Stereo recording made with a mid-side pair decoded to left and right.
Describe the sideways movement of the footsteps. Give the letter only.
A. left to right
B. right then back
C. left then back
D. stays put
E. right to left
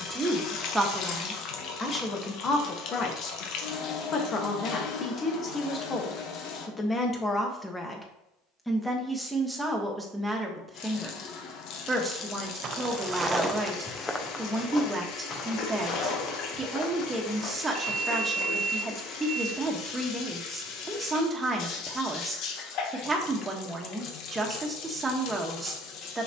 E.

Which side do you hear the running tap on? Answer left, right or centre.
left.